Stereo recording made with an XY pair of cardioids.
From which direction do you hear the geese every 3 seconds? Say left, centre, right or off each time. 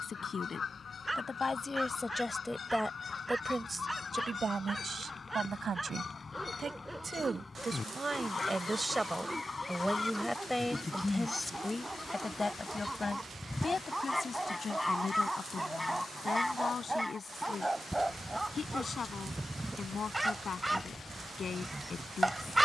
left, left, left, left, centre, centre, centre, centre.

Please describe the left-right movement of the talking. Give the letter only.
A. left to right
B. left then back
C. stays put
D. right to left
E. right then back
E.